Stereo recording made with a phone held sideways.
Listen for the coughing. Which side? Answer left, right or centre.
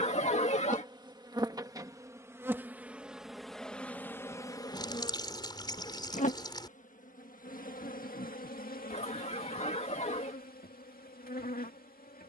left.